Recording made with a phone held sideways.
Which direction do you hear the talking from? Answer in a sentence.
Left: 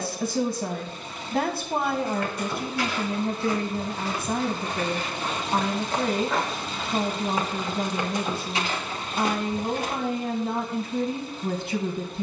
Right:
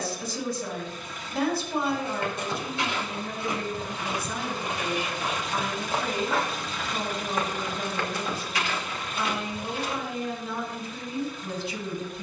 In this clip you hear the talking on the left.